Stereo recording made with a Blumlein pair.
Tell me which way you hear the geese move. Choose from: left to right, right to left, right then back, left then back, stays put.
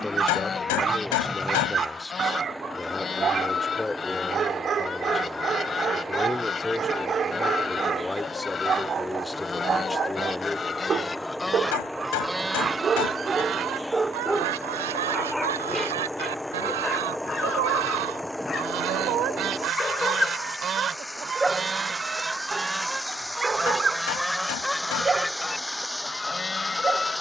right then back.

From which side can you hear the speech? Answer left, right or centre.
centre.